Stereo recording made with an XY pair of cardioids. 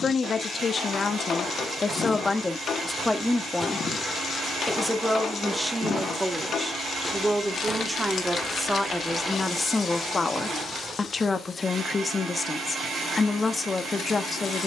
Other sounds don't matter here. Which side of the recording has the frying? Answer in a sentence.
You can hear the frying on the left.